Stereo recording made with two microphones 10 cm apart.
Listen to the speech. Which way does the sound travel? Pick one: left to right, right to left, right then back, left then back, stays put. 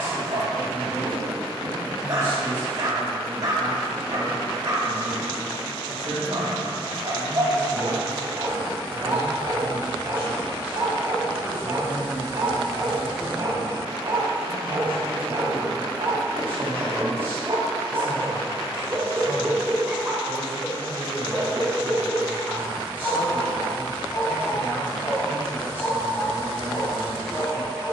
right then back.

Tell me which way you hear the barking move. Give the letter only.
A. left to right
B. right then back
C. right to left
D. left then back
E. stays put
C.